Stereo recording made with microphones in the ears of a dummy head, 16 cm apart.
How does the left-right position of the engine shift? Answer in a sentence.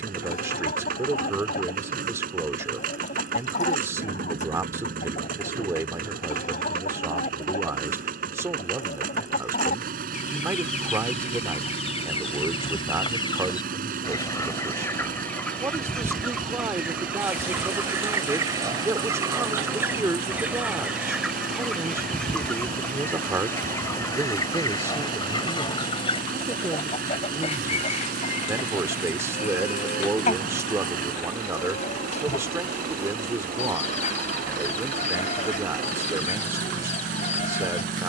In this clip you hear the engine stay in one place.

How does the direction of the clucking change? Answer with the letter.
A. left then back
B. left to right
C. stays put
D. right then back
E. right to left
D.